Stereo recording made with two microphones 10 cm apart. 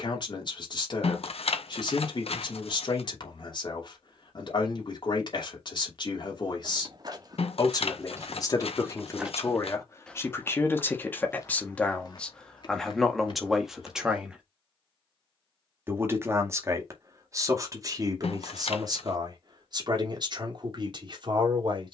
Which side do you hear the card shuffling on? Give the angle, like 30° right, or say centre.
80° left.